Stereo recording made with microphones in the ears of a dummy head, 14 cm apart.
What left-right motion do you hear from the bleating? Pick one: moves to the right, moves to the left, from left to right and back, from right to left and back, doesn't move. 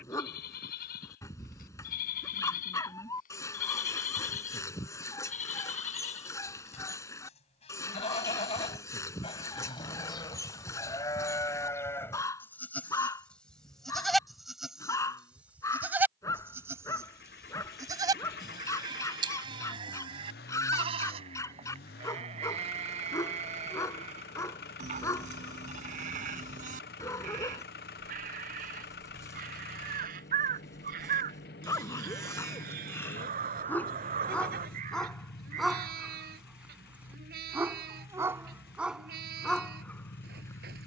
moves to the right.